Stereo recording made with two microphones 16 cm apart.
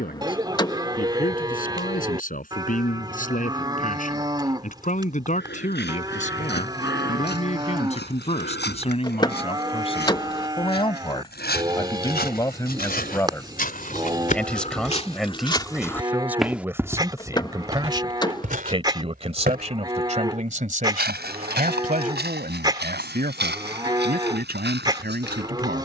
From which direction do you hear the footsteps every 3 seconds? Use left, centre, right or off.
off, left, left, left, left, centre, right, right, right.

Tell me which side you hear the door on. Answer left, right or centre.
left.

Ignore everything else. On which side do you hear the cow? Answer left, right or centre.
right.